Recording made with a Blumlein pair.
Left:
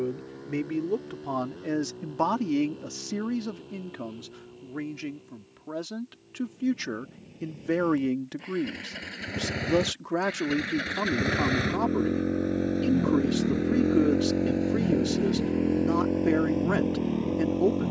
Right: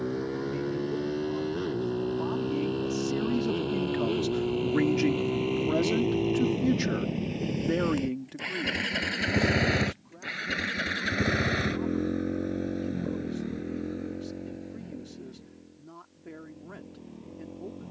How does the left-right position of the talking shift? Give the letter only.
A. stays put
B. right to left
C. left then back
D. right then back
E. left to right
D.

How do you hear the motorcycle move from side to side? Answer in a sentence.
In this clip you hear the motorcycle travel towards the left.